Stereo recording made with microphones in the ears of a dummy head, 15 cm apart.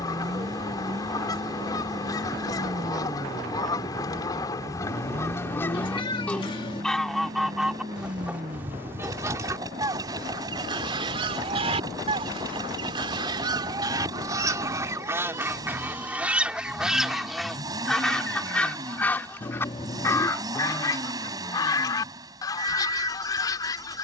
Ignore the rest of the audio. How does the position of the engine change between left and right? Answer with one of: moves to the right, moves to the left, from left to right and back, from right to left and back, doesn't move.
doesn't move.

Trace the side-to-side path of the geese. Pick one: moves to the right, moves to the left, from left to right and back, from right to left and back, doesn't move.
from left to right and back.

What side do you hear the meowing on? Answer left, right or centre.
left.